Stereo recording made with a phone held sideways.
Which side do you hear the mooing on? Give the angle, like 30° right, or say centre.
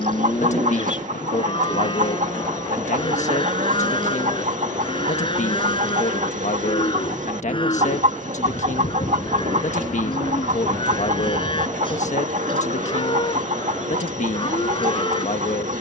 40° left.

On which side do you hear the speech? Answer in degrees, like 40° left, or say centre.
60° left.